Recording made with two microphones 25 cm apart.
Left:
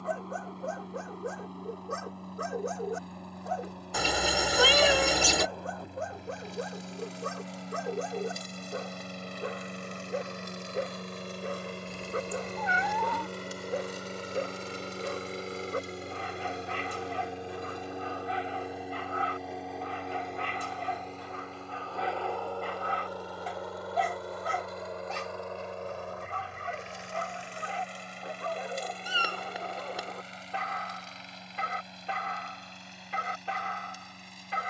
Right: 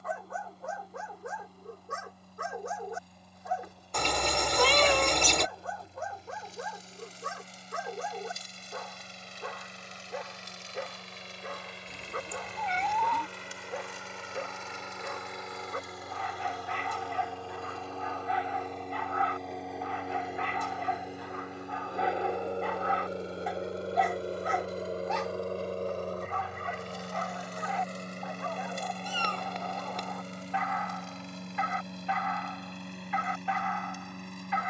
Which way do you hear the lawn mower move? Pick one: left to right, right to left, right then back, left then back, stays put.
left to right.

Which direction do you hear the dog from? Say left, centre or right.
left.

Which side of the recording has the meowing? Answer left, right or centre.
centre.